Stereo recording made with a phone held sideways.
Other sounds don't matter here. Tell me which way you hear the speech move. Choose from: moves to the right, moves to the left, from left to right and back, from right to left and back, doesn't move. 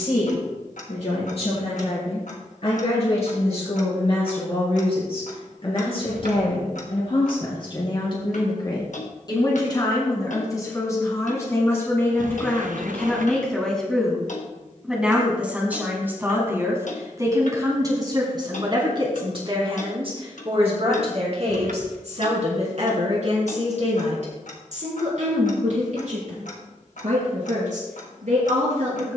moves to the right.